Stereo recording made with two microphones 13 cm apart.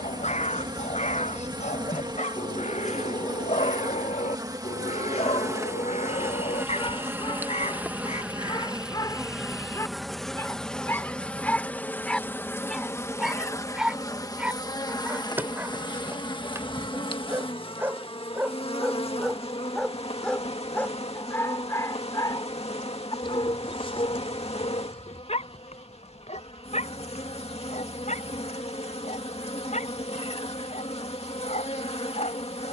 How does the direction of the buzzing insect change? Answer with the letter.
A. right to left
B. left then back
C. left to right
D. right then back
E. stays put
A.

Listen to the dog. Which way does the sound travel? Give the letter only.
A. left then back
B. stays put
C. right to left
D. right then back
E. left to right
D.